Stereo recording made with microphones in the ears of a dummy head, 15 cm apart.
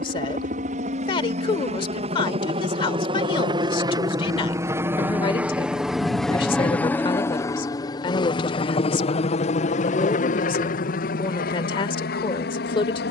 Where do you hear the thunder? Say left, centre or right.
right.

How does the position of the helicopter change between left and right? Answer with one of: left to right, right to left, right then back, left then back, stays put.
right to left.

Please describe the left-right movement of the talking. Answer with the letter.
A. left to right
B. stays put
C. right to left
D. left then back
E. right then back
B.